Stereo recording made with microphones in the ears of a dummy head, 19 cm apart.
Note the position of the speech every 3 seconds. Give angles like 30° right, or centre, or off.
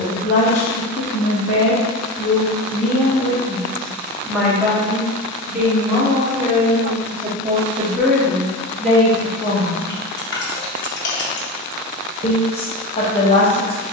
30° left, centre, 10° right, 10° left, 30° left.